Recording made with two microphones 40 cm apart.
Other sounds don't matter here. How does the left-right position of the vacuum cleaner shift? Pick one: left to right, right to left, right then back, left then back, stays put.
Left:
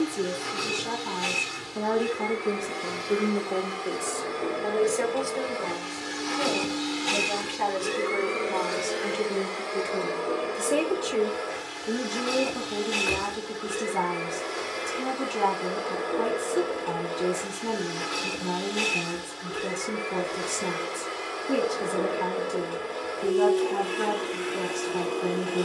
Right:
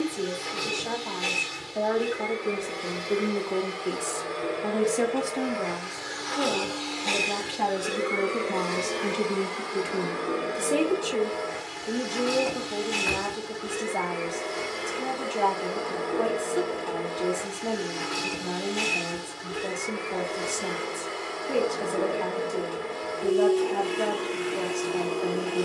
left to right.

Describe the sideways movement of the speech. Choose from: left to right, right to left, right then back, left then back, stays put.
right then back.